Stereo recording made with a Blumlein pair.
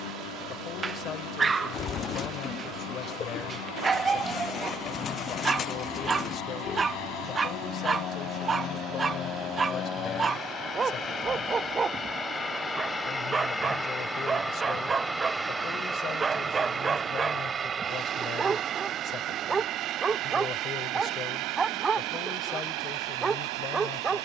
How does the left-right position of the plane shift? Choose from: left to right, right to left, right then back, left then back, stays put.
left to right.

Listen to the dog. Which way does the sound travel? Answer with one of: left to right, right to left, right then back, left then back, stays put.
stays put.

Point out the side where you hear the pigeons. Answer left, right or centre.
left.